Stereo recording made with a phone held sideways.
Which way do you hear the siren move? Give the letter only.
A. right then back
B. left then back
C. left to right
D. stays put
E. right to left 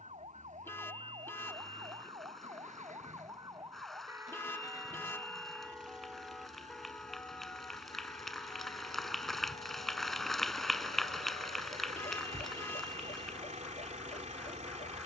E.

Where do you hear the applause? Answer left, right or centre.
centre.